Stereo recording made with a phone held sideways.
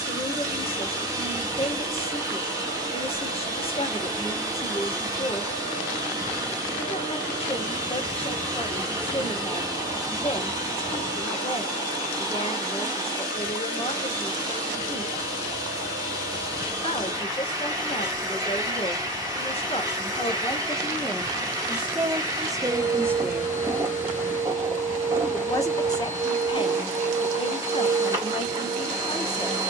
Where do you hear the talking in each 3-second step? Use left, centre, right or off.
left, left, left, left, left, left, left, centre, left, left.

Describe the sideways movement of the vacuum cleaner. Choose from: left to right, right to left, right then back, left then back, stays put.
stays put.